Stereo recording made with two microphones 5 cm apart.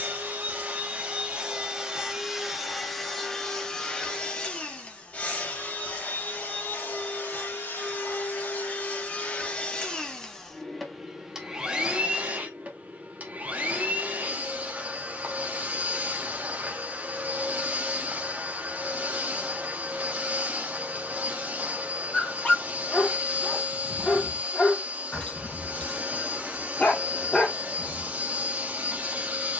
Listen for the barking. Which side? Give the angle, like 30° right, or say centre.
20° left.